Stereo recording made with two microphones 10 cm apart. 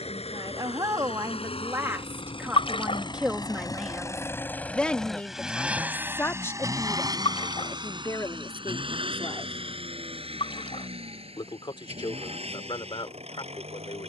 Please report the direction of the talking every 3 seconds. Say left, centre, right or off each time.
right, centre, left, left, left.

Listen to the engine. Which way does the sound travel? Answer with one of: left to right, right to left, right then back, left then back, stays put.
left to right.